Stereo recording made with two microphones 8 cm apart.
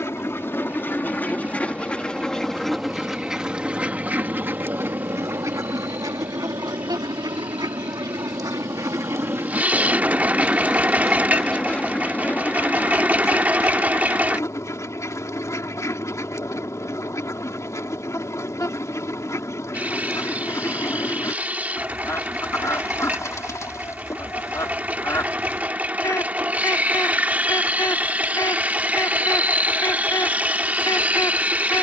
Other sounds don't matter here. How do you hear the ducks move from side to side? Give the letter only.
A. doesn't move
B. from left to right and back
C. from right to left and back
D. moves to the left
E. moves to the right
B.